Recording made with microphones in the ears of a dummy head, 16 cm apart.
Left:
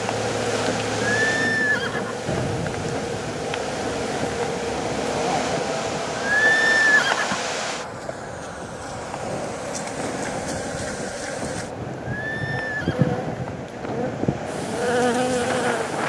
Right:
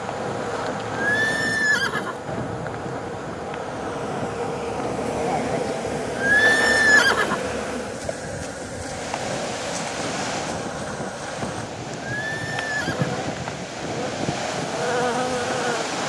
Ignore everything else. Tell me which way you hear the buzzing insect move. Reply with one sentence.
You can hear the buzzing insect go right and come back.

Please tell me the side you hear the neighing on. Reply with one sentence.
You can hear the neighing on the right.